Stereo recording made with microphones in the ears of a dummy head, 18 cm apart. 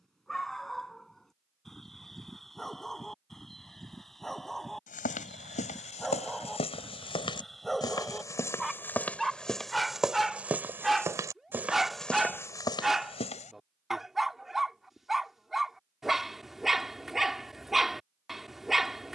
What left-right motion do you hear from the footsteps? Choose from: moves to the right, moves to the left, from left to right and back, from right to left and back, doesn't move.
from left to right and back.